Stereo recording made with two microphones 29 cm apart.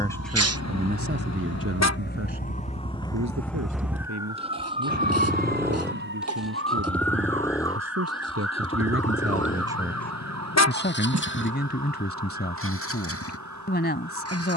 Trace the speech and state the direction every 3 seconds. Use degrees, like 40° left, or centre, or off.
40° right, 70° right, 70° right, 10° left, 40° left.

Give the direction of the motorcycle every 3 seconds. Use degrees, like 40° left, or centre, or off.
40° right, 20° right, 10° left, 30° left, 50° left.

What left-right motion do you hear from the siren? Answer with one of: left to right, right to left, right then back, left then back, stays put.
left to right.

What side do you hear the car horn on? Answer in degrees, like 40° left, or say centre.
60° left.